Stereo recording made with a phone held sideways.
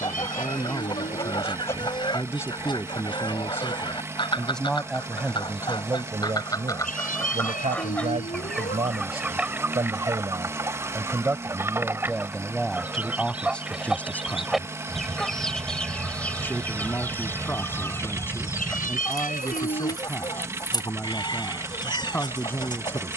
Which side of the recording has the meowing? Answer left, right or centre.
left.